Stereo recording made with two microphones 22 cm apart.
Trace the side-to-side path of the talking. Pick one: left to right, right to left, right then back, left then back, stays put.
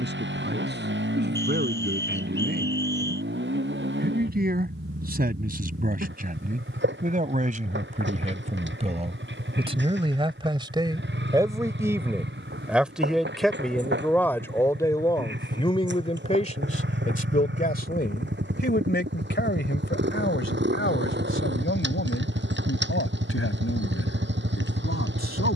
right to left.